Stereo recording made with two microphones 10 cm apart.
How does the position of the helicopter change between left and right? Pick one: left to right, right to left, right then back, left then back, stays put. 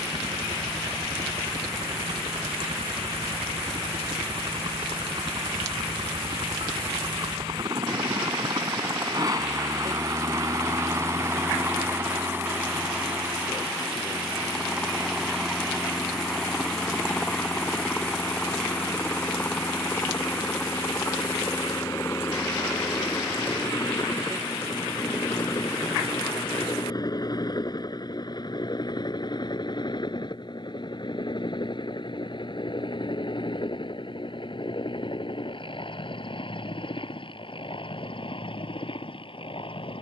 right to left.